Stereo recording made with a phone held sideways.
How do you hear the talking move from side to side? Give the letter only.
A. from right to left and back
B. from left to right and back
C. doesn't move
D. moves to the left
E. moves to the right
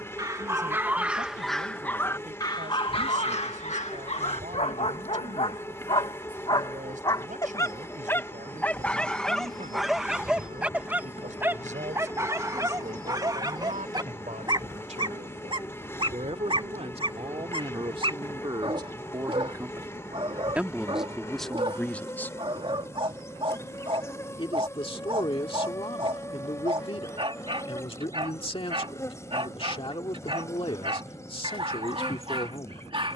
D.